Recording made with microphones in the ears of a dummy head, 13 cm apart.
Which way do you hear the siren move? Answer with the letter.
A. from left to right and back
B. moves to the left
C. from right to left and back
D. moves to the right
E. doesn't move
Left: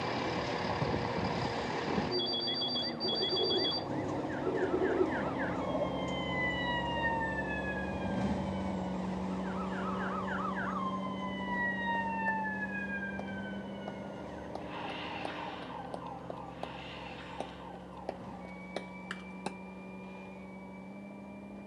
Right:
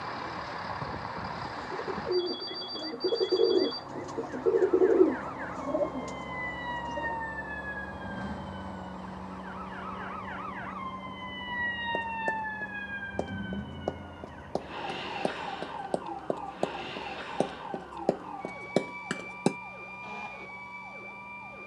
D.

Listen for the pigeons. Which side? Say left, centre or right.
right.